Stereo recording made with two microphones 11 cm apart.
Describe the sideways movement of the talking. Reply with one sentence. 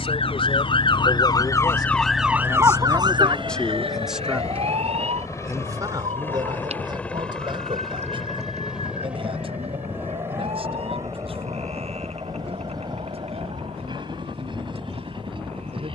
You can hear the talking move from left to right.